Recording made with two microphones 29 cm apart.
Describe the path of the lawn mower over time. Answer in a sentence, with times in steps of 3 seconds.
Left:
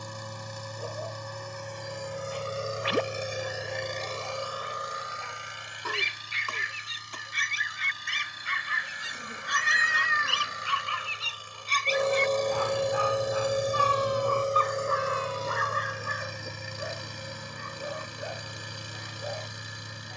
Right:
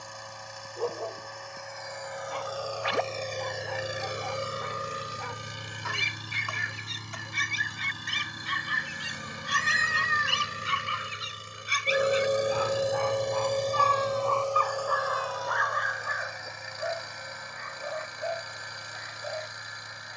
You can hear the lawn mower on the left from 0 s, on the right from 3 s, in the centre from 12 s and on the left from 15 s.